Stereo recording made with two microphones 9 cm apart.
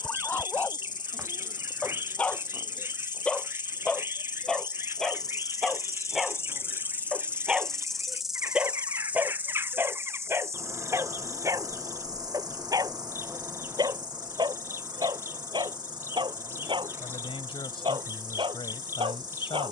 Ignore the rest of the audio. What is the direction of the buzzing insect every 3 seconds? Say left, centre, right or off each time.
left, left, centre, right, right, right, right.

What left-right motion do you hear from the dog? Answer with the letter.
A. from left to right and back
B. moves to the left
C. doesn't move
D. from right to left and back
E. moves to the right
E.